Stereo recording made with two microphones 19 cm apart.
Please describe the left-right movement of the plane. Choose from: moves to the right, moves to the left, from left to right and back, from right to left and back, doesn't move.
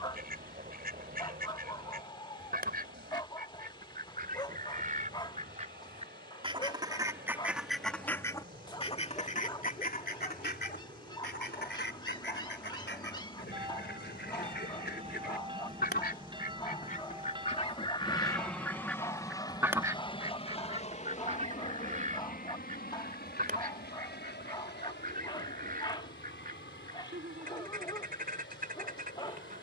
moves to the left.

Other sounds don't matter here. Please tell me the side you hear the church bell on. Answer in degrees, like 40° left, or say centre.
30° right.